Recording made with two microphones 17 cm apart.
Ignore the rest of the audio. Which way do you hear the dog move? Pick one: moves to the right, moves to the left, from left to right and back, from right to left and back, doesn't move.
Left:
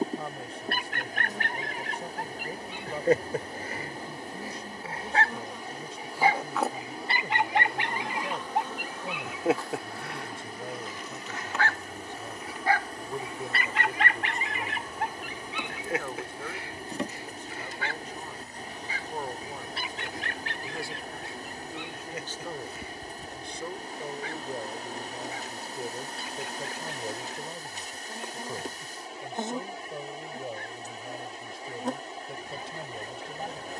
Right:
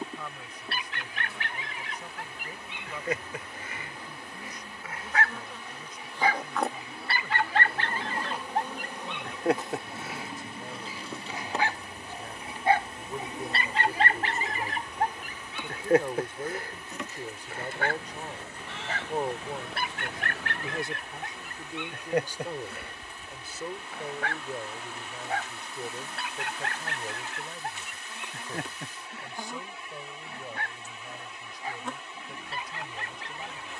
moves to the right.